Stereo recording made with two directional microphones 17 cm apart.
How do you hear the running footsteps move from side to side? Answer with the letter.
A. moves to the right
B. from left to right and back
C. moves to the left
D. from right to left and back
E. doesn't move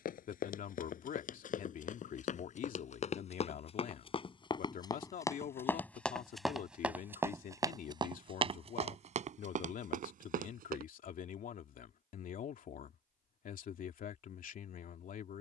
A.